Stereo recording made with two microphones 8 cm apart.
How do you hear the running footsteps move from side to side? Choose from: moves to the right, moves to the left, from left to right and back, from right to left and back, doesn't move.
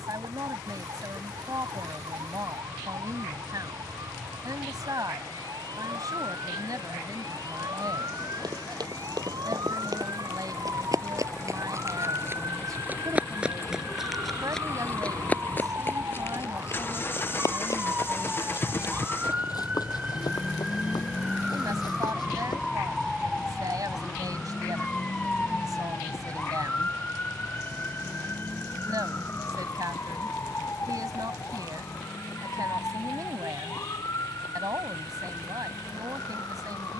moves to the left.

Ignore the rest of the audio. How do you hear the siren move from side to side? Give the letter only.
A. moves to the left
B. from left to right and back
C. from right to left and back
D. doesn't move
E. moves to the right
A.